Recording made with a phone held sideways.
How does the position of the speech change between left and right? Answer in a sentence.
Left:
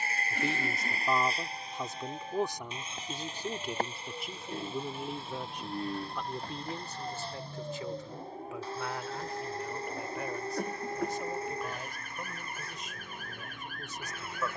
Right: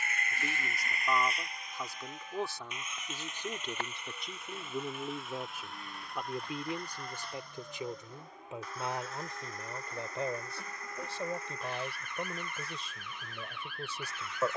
You can hear the speech move from left to right.